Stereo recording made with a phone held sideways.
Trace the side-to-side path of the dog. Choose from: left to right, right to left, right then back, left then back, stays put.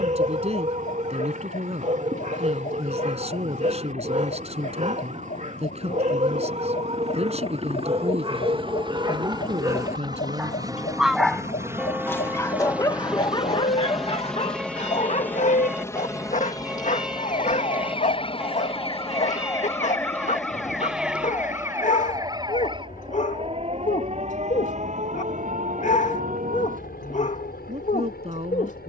right to left.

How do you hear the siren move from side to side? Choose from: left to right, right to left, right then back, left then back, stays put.
left to right.